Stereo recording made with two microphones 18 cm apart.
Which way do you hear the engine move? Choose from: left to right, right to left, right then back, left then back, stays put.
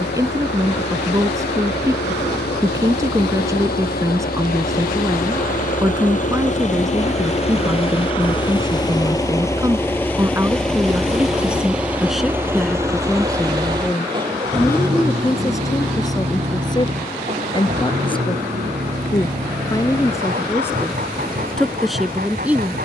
left to right.